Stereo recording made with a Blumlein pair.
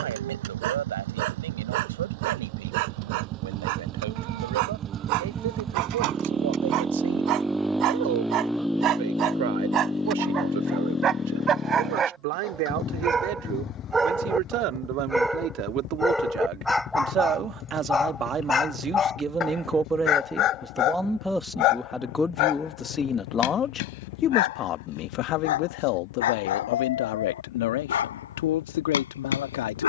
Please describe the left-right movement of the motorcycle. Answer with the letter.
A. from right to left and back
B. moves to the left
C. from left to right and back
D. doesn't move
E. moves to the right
B.